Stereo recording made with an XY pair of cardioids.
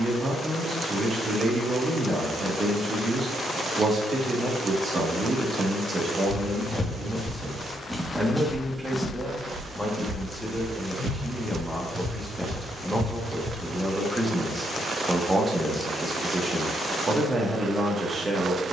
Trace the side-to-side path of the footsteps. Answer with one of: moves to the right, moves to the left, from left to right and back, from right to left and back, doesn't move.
moves to the right.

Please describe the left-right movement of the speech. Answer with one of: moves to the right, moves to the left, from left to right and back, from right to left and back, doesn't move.
from right to left and back.